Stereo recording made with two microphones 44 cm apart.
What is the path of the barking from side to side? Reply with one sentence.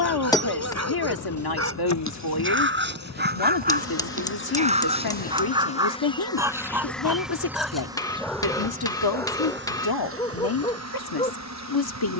You can hear the barking go from the right side to the left.